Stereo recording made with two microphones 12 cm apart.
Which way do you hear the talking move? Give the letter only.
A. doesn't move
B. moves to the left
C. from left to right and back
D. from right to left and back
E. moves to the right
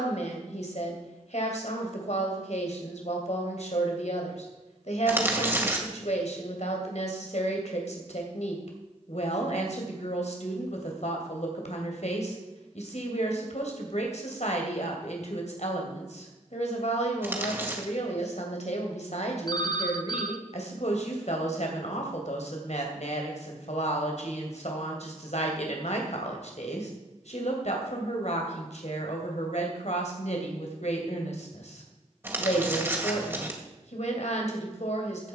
A.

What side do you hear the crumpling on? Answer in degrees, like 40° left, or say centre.
20° right.